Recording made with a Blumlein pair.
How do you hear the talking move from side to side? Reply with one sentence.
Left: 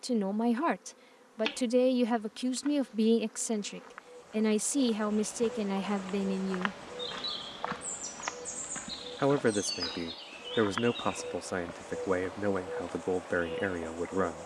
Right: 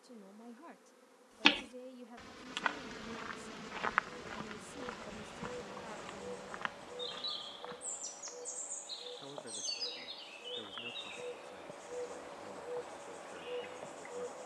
You can hear the talking stay in one place.